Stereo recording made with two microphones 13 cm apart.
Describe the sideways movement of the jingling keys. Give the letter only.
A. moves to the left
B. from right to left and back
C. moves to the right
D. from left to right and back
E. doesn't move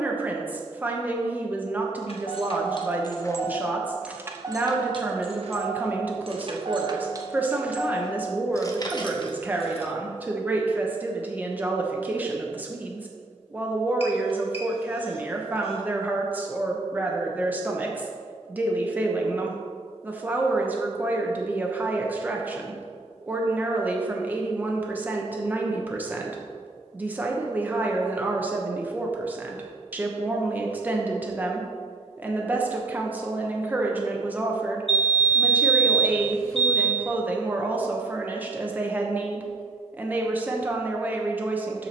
D.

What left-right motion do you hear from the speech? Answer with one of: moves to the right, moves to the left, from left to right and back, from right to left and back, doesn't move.
doesn't move.